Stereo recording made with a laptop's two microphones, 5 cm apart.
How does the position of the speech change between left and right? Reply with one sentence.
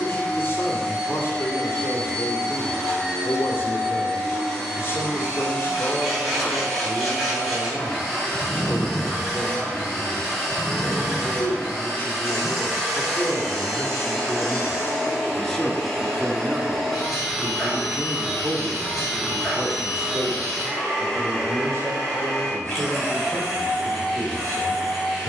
You can hear the speech move from left to right.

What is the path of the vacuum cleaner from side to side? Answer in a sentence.
You can hear the vacuum cleaner stay in one place.